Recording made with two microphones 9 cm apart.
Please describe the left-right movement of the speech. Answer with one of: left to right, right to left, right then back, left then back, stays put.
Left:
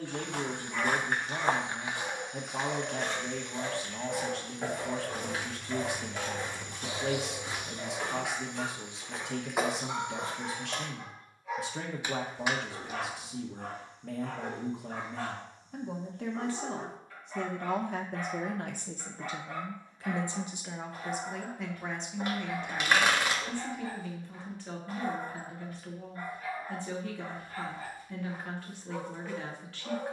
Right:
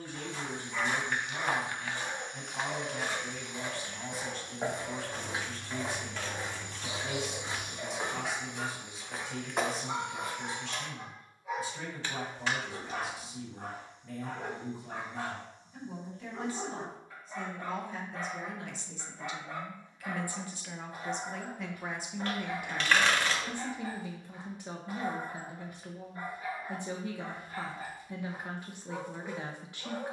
left to right.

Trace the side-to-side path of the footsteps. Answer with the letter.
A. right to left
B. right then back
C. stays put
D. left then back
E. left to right
B.